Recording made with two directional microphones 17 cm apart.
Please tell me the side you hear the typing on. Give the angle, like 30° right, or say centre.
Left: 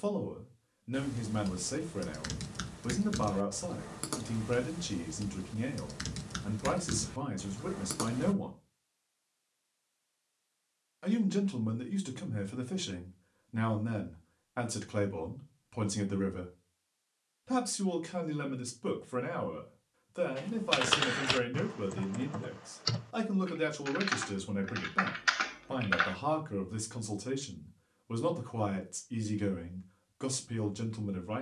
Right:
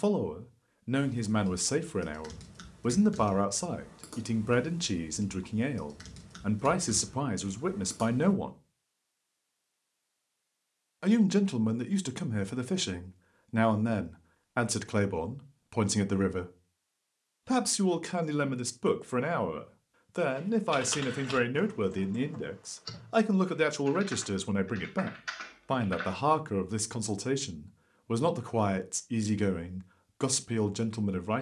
50° left.